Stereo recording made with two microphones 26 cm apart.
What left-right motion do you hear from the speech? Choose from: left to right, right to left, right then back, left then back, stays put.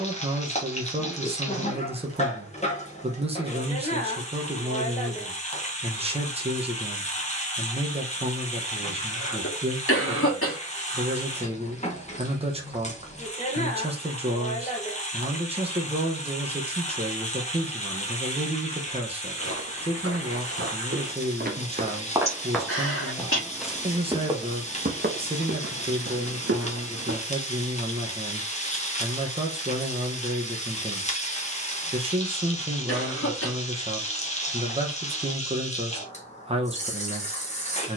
stays put.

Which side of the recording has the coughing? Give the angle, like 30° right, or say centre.
60° left.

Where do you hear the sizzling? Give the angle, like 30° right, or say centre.
30° left.